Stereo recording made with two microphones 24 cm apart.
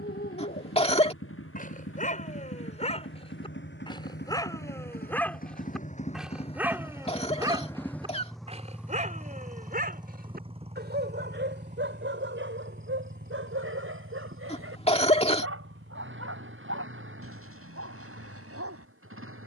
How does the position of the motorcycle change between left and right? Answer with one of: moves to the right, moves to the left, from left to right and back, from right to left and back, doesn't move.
moves to the right.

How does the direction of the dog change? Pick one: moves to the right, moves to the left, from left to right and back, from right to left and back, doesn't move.
moves to the right.